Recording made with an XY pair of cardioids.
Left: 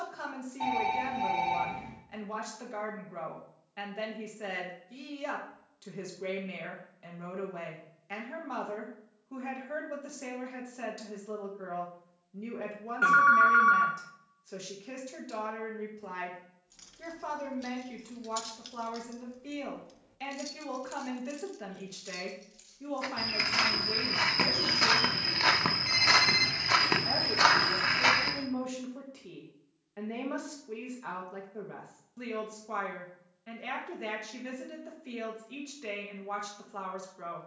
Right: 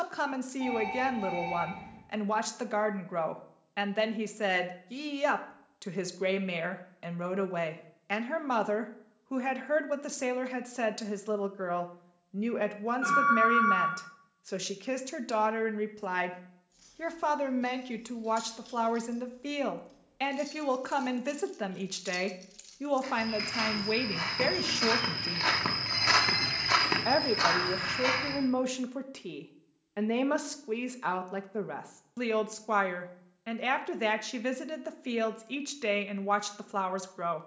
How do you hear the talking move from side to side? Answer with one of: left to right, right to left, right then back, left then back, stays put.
stays put.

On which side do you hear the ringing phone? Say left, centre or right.
left.